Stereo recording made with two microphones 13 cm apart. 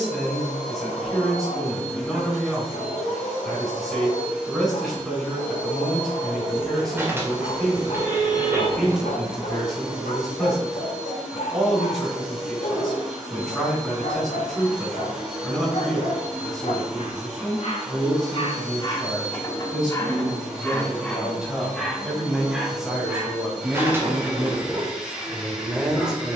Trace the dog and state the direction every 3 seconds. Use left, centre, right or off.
left, left, left, left, left, left, left, centre, right.